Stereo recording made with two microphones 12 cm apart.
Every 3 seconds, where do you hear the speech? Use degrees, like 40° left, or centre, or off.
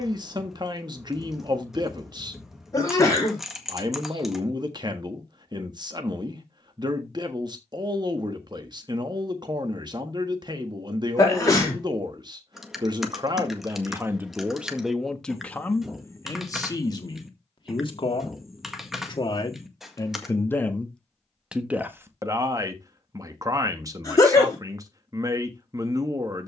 40° right, 40° right, 40° right, 40° right, 20° right, 30° left, 30° left, 20° right, 30° right.